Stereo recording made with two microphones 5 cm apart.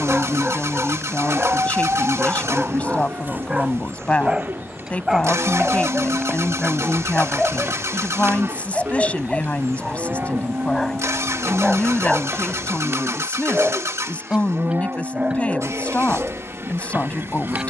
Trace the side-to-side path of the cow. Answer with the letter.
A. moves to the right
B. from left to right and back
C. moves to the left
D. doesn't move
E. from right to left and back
D.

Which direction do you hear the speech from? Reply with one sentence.
You can hear the speech on the left.